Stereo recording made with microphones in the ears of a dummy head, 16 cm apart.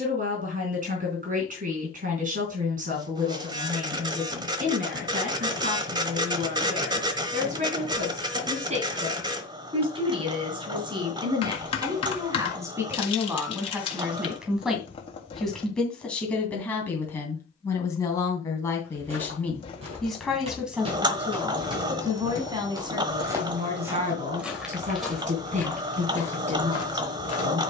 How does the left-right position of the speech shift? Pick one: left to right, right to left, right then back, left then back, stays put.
left then back.